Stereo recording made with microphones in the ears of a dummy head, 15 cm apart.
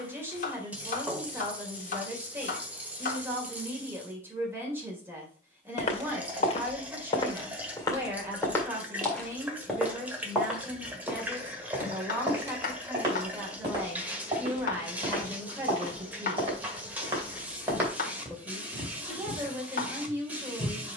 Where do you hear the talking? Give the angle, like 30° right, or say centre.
10° right.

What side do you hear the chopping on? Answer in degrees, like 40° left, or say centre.
50° left.